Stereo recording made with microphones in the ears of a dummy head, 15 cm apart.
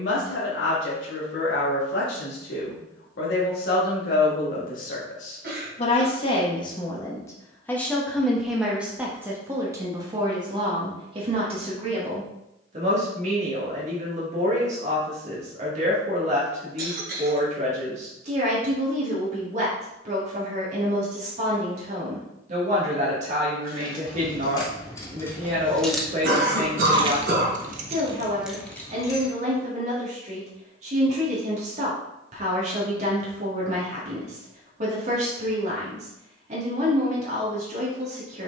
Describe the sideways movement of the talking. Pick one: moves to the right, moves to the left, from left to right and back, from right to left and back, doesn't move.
moves to the right.